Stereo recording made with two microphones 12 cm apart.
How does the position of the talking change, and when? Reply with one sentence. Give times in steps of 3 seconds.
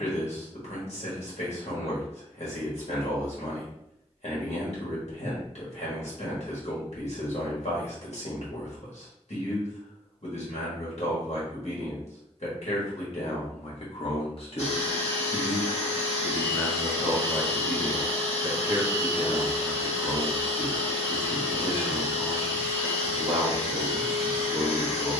In this clip you hear the talking on the left from 0 s, in the centre from 15 s and on the right from 18 s.